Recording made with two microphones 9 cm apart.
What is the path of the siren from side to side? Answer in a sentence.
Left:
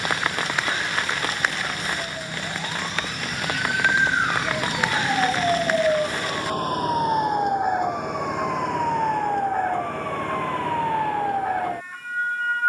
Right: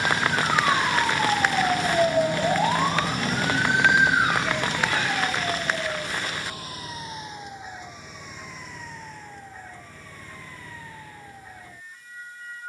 In this clip you hear the siren move to the left.